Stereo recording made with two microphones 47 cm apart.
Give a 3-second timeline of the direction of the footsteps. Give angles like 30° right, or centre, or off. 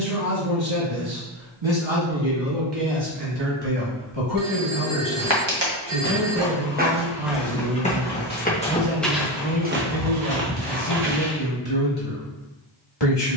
off, 60° right, centre, 30° right, off.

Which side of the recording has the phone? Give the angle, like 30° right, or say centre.
60° right.